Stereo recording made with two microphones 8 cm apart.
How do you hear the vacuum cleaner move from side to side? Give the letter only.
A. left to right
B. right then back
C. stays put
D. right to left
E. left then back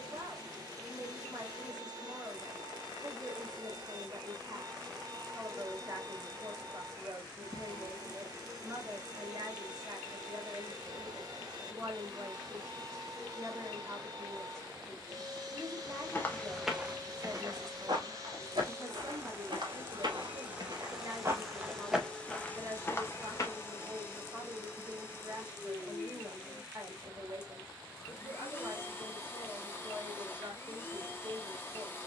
D.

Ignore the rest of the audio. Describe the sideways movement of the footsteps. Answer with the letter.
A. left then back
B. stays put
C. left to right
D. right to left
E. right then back
E.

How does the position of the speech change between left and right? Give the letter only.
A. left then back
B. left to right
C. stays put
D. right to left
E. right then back
C.